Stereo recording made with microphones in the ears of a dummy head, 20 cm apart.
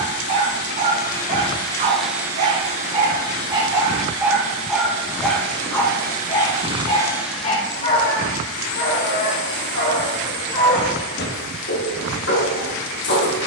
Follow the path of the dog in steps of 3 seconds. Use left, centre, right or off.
right, centre, left, left, left.